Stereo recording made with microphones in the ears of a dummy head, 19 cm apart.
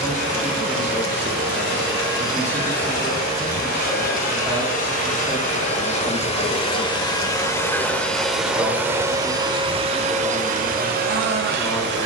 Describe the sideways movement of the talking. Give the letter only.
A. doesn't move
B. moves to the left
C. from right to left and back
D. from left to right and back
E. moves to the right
A.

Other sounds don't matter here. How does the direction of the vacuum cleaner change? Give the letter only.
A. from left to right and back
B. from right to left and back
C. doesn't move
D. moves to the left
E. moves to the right
E.